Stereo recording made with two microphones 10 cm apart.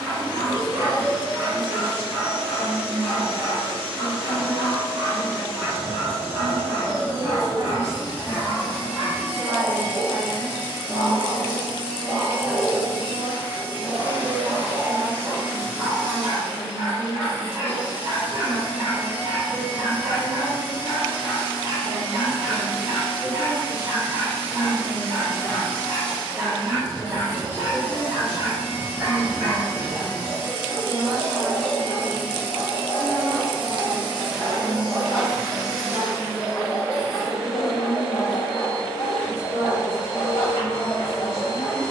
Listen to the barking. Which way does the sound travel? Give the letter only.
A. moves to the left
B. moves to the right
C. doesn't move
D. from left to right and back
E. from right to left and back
A.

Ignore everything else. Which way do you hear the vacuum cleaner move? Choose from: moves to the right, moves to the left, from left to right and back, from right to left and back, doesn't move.
moves to the left.